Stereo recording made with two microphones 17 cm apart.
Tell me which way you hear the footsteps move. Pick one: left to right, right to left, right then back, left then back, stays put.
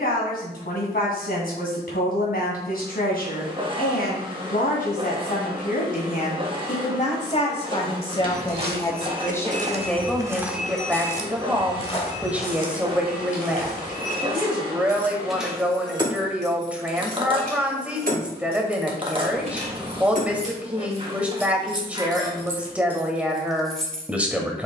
right to left.